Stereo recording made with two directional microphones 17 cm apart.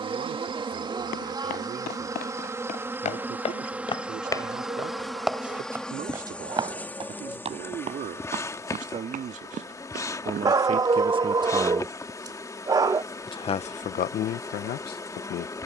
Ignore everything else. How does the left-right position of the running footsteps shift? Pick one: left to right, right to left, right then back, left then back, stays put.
left to right.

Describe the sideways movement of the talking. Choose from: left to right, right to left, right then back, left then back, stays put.
right to left.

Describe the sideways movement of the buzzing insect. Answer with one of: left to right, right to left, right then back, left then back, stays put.
right to left.